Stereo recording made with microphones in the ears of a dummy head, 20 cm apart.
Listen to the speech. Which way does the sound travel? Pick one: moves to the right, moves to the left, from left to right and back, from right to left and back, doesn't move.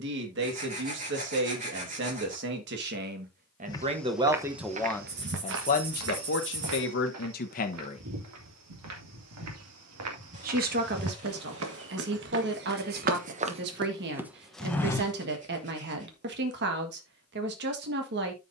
from right to left and back.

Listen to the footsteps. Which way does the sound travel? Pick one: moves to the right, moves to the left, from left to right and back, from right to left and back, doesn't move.
from left to right and back.